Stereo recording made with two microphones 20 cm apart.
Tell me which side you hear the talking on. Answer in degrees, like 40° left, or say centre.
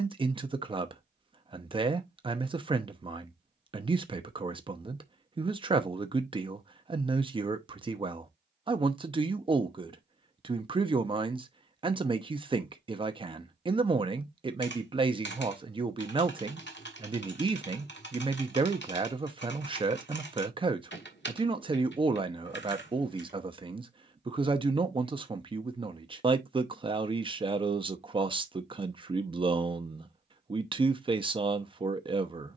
20° right.